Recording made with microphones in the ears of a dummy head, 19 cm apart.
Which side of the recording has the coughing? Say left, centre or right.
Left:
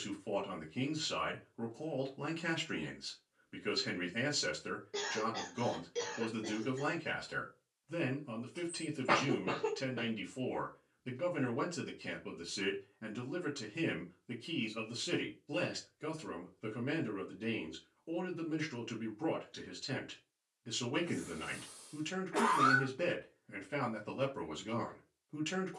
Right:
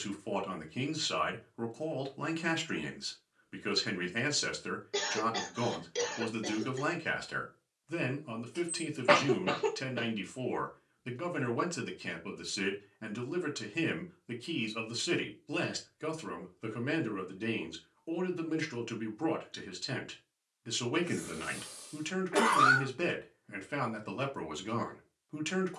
right.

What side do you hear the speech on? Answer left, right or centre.
right.